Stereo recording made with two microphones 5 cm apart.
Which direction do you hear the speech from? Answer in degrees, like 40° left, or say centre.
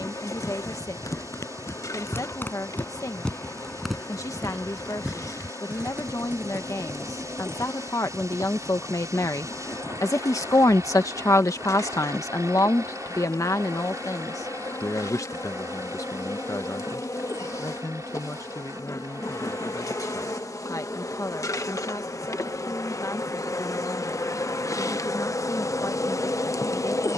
80° left.